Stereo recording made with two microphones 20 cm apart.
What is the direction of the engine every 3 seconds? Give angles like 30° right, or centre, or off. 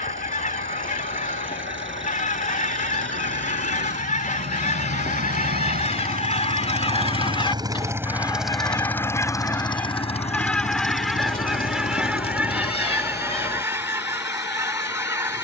80° right, 60° right, 20° right, 30° left, 60° left.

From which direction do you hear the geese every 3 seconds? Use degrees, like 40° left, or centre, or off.
40° left, 40° left, 30° left, 10° left, 10° right.